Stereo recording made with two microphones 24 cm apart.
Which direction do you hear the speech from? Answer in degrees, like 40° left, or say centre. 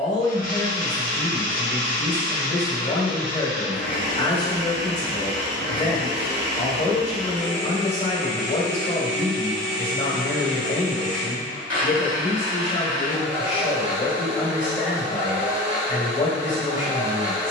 30° left.